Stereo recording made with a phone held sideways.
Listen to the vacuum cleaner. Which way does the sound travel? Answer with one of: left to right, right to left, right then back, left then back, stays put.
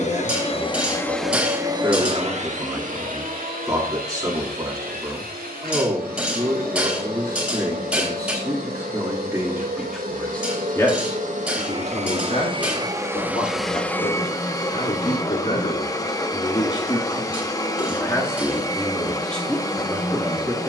right then back.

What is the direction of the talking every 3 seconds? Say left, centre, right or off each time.
right, right, right, centre, left, left, centre.